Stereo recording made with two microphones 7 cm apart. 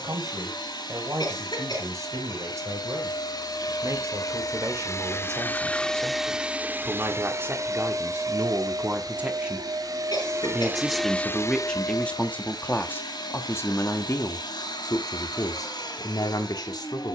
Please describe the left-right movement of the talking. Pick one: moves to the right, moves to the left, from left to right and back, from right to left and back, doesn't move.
moves to the left.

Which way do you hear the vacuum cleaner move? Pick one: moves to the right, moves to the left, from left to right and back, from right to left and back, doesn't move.
from left to right and back.